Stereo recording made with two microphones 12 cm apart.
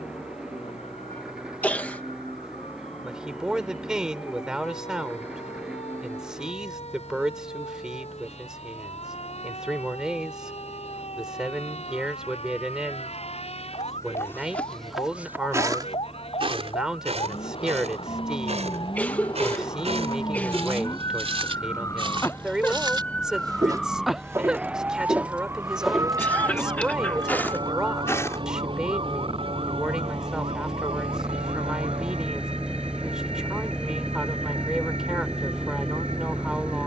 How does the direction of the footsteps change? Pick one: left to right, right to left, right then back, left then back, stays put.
right then back.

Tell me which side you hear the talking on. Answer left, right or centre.
centre.